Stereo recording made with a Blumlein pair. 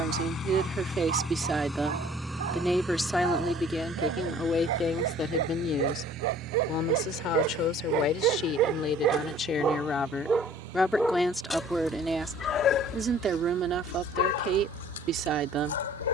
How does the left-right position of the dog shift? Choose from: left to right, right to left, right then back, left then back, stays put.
right to left.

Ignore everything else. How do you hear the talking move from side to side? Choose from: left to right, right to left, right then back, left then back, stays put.
left then back.